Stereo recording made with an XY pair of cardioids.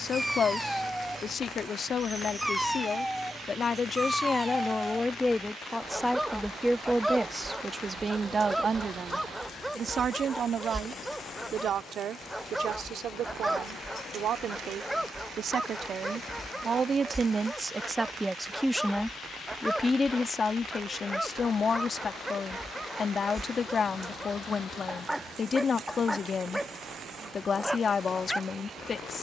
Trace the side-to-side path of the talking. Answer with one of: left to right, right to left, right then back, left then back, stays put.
right then back.